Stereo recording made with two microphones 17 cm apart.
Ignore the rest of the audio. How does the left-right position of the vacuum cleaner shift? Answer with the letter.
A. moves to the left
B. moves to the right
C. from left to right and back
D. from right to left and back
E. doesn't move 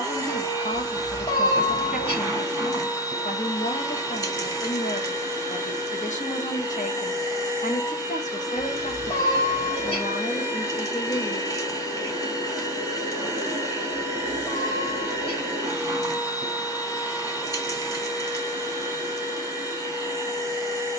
E.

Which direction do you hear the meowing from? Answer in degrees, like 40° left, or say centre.
30° left.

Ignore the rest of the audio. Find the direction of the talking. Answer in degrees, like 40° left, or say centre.
50° left.